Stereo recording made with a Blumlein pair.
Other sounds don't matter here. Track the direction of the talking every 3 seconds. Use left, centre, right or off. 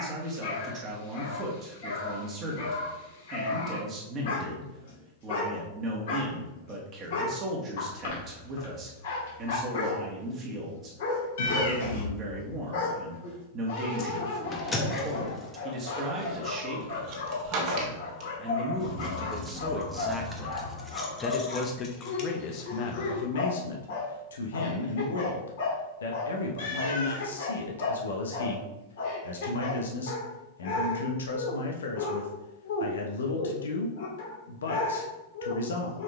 right, right, right, right, right, right, centre, left, left, left, left, left.